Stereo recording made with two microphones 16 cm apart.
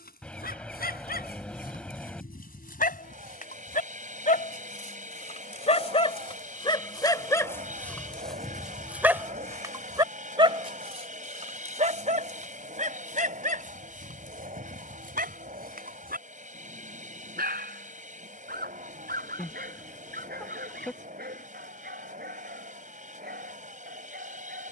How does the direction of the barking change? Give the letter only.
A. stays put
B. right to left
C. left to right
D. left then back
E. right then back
C.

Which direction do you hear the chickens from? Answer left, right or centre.
centre.